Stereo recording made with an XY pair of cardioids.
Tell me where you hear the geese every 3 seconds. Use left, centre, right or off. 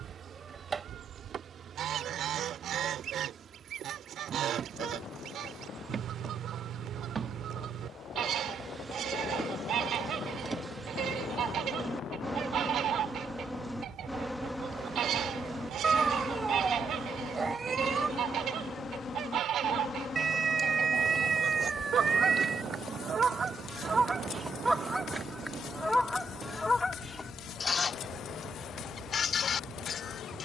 right, right, right, right, right, right, right, right, centre, left.